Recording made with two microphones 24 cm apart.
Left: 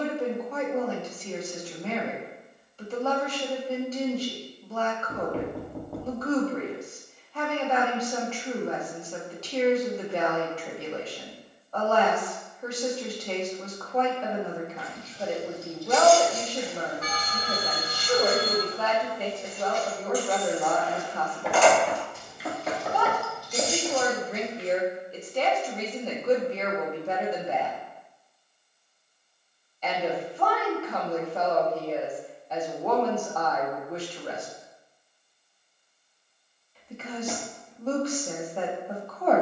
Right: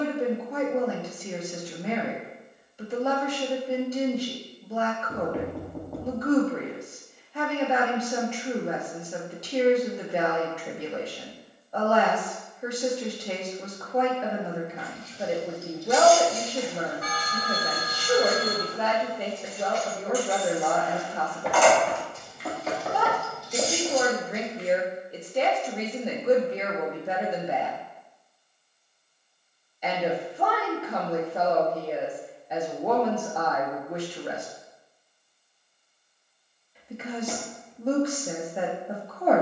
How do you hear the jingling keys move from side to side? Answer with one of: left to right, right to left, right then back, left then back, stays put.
left then back.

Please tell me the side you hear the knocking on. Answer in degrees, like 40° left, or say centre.
centre.